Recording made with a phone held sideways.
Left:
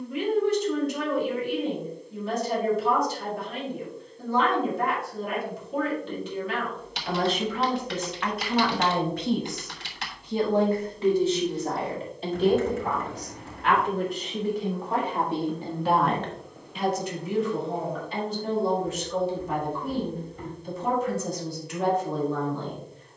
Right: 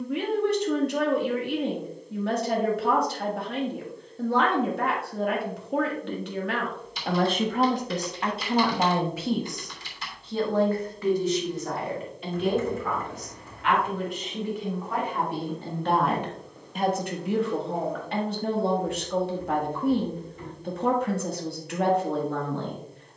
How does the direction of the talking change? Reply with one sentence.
You can hear the talking go left and come back.